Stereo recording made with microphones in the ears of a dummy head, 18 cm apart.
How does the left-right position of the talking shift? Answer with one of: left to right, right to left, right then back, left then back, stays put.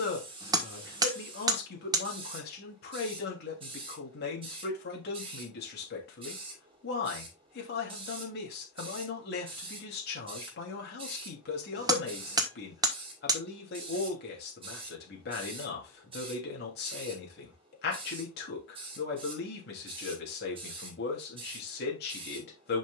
stays put.